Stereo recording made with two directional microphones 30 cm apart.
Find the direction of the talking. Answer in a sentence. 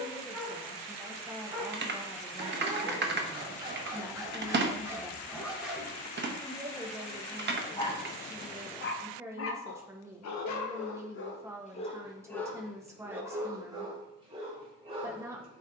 In this clip you hear the talking in the centre.